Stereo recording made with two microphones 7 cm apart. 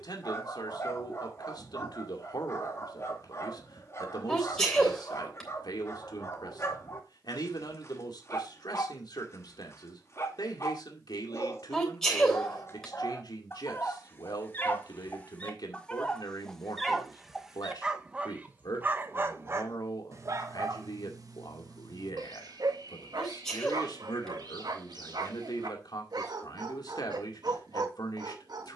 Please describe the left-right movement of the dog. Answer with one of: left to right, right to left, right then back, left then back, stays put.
left to right.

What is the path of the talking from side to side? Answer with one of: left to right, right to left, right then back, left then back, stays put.
stays put.